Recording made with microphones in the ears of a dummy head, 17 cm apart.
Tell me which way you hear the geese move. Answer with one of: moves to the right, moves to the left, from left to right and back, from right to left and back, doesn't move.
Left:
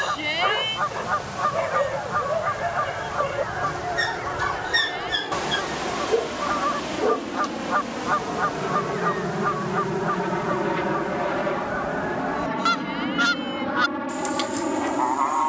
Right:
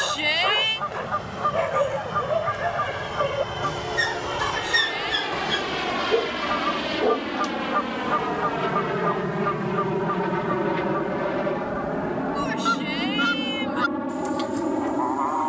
doesn't move.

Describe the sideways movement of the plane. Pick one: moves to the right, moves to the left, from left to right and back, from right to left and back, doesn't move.
moves to the left.